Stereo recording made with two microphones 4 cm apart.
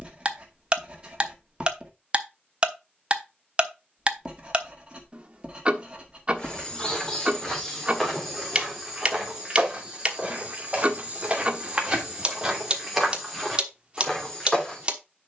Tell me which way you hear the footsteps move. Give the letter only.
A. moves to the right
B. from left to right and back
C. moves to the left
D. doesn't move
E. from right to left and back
B.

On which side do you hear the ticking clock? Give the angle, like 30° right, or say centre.
30° right.